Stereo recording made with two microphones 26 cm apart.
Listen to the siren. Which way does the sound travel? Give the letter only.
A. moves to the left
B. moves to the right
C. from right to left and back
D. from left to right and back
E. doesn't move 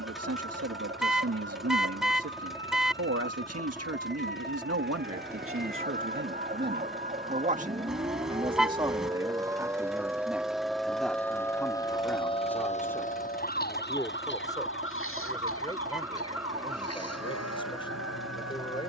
A.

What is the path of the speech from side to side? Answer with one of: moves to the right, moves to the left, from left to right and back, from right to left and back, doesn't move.
moves to the left.